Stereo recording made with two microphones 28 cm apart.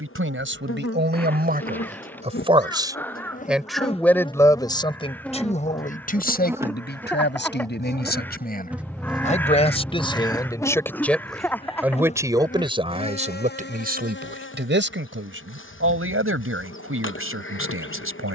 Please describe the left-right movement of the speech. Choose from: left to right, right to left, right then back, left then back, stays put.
left then back.